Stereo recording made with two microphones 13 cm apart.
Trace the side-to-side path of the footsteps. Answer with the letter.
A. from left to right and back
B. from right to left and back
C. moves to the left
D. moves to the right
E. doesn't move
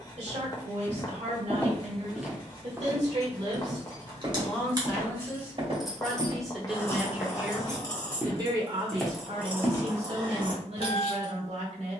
A.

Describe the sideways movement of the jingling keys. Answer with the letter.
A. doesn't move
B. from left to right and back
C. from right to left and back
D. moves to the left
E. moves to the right
C.